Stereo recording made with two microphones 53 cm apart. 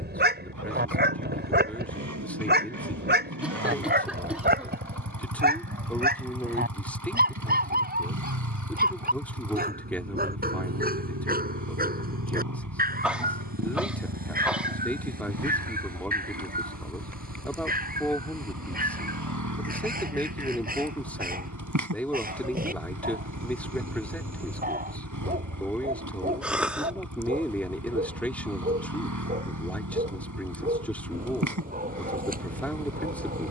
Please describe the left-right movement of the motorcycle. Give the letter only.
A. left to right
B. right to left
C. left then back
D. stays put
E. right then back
D.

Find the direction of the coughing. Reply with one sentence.
In this clip you hear the coughing in the centre.